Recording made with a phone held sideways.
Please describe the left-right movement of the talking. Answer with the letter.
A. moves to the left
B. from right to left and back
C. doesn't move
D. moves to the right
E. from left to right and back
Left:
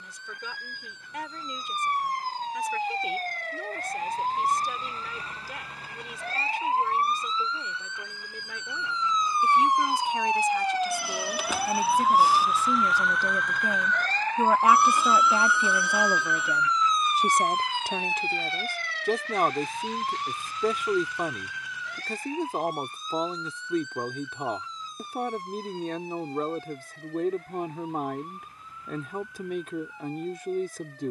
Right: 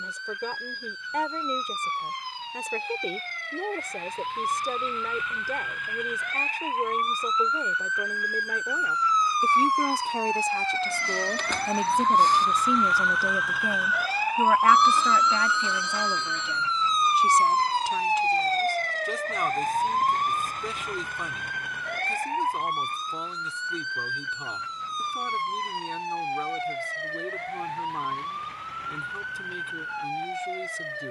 A.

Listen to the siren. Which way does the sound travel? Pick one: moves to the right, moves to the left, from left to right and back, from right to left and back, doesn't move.
moves to the right.